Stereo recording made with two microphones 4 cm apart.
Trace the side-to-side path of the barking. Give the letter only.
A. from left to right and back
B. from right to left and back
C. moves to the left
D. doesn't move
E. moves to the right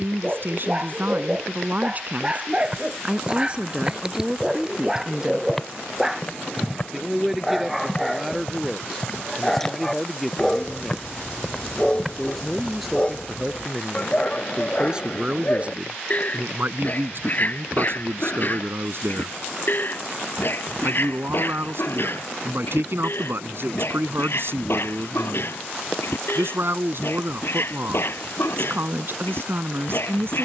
C.